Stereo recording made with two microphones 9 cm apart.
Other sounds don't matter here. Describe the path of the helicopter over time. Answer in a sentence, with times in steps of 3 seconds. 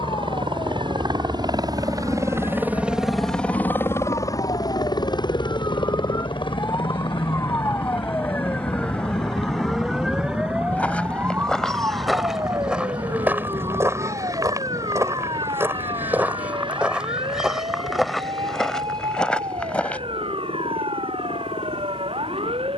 You can hear the helicopter on the right from 0 s and on the left from 3 s.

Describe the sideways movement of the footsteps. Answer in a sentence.
In this clip you hear the footsteps move from left to right and back again.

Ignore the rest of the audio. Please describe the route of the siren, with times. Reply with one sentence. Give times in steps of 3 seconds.
You can hear the siren on the left from 0 s, in the centre from 9 s and on the right from 12 s.